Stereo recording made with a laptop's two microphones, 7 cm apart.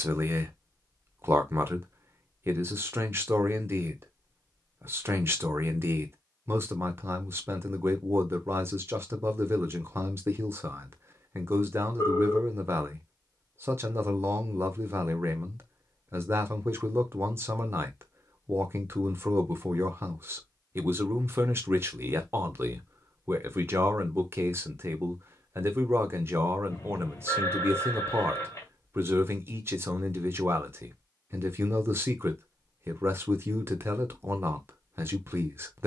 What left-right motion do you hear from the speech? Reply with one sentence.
In this clip you hear the speech stay in one place.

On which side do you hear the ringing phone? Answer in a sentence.
In this clip you hear the ringing phone on the left.